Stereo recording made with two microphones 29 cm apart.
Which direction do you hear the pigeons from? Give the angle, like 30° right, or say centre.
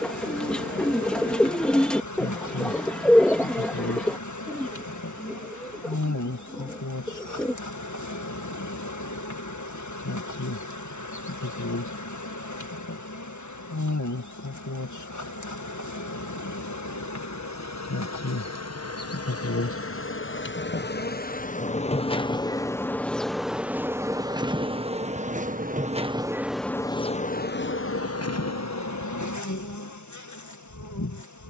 centre.